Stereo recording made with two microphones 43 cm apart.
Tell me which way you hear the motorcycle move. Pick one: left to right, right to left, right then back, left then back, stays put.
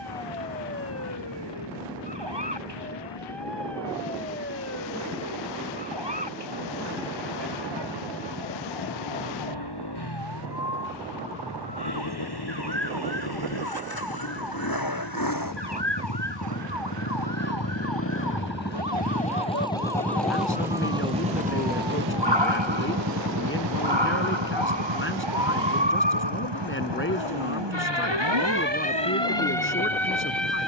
left to right.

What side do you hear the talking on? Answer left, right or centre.
left.